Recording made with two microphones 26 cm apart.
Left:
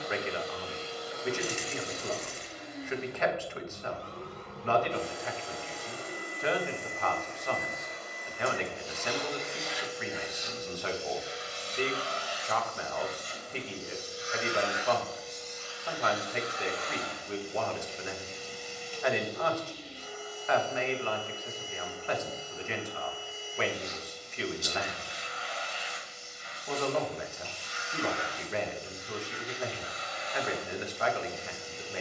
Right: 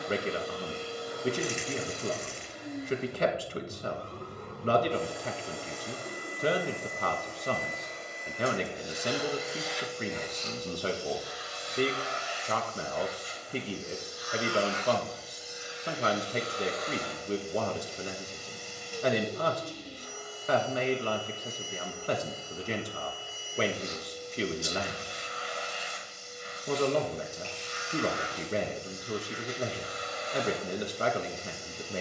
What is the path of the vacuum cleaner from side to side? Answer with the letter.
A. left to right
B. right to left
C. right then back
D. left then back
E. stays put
D.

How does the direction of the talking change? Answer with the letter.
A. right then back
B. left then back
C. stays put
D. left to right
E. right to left
C.